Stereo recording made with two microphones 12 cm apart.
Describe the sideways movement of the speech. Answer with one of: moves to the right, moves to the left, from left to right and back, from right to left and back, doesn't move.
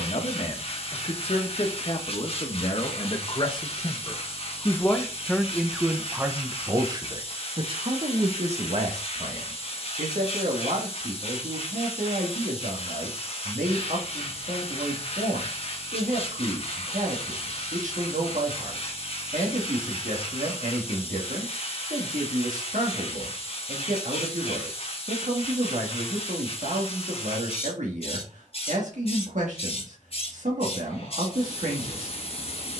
moves to the right.